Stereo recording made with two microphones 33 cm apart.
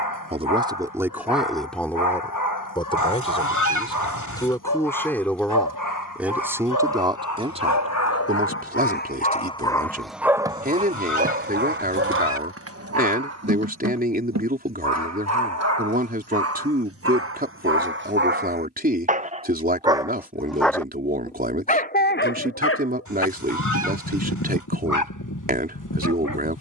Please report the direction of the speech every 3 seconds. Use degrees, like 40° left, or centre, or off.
centre, 10° left, 20° right, 30° right, 30° right, 30° right, 30° right, 30° right, 30° right.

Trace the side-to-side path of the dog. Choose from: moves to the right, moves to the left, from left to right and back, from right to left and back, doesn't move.
from left to right and back.